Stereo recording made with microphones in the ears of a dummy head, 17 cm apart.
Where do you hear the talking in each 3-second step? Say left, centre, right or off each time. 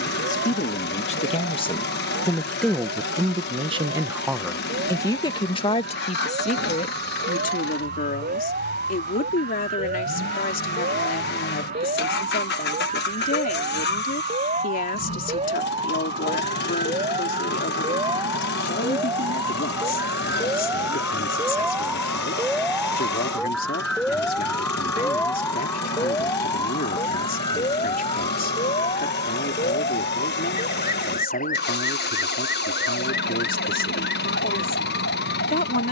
left, centre, left, left, left, left, left, left, left, left, left, left.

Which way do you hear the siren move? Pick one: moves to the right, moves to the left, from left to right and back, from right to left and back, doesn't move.
moves to the left.